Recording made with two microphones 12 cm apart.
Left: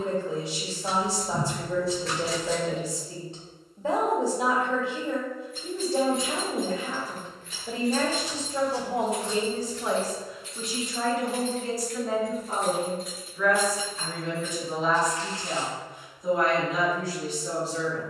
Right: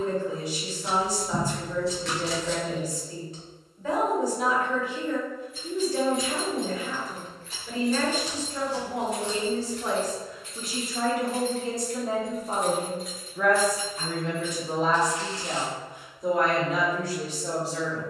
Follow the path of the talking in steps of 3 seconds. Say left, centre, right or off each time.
left, left, left, centre, right, right.